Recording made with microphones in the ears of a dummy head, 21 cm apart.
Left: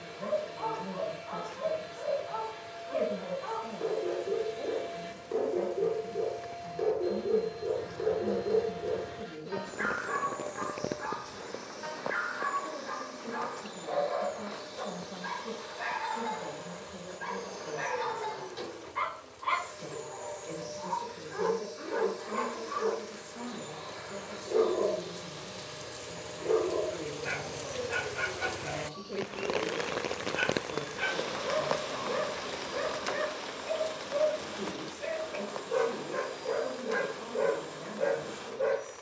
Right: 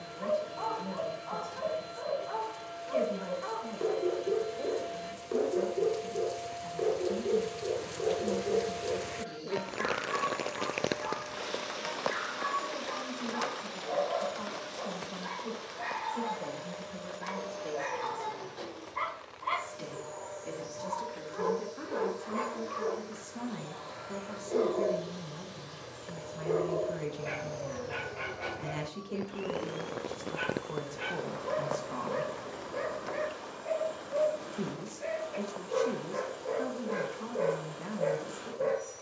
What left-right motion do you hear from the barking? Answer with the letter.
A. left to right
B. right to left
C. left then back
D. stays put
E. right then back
B.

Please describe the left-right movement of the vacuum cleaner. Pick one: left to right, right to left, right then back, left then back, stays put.
stays put.